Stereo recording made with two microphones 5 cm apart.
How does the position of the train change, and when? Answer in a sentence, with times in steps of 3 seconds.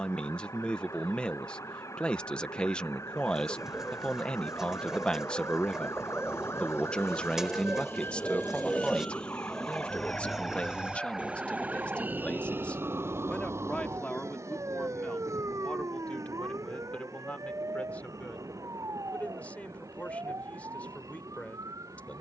You can hear the train on the left from 0 s, in the centre from 9 s and on the right from 12 s.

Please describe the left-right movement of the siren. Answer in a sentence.
You can hear the siren go from the left side to the right.